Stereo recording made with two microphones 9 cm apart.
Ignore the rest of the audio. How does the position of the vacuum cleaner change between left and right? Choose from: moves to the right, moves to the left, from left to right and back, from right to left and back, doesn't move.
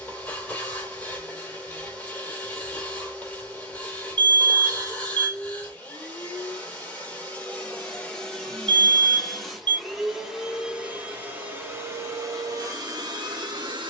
moves to the right.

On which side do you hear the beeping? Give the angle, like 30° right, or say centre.
60° right.